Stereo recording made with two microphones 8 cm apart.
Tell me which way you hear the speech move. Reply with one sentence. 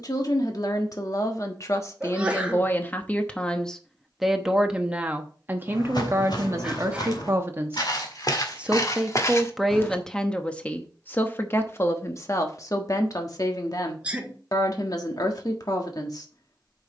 You can hear the speech go right and come back.